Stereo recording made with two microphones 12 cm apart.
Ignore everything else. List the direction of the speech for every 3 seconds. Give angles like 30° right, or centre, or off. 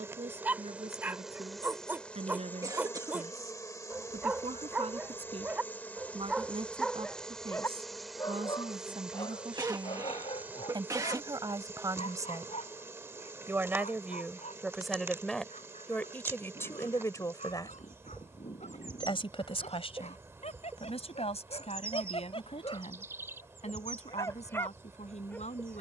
60° right, 60° right, 50° right, 40° right, 20° right, 20° left, 50° left, 70° left, 70° left.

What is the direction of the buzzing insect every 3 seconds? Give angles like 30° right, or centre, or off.
centre, 20° left, centre, 20° right, 20° right, 20° right, 20° right, 20° right, 20° right.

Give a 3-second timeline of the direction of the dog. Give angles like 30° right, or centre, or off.
20° right, 20° right, 10° left, 50° left, 70° left, 80° left, 70° left, 50° left, 20° left.